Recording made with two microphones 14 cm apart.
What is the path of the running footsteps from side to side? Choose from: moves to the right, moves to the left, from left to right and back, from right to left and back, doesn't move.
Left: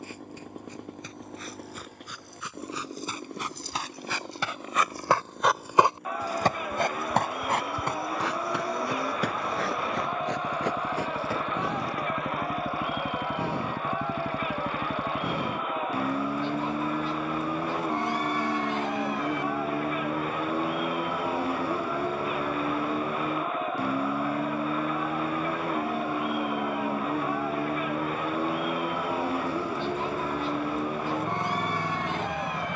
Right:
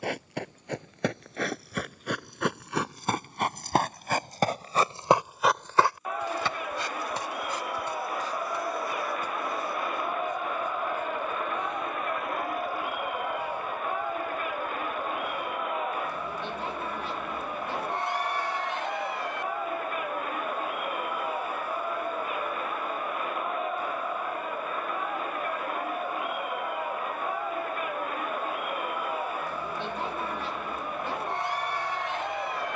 moves to the left.